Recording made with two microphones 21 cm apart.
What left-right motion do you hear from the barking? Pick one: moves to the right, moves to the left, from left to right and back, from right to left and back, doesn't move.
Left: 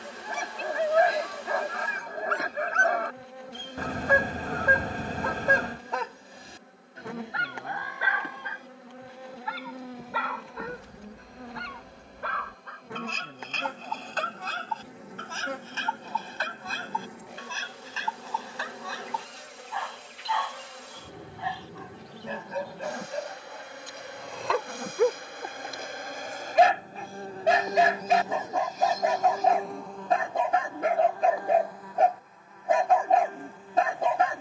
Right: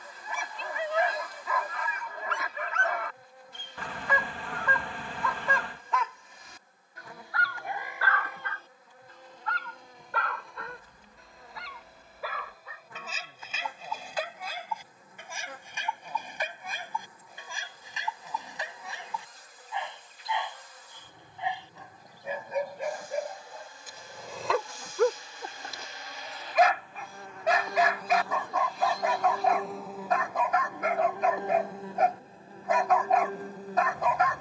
from left to right and back.